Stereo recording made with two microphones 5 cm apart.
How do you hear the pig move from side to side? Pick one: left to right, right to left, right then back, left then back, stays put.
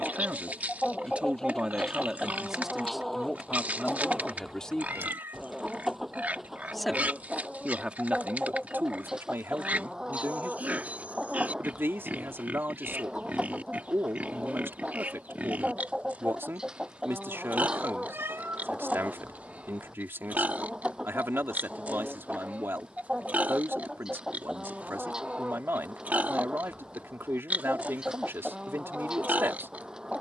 stays put.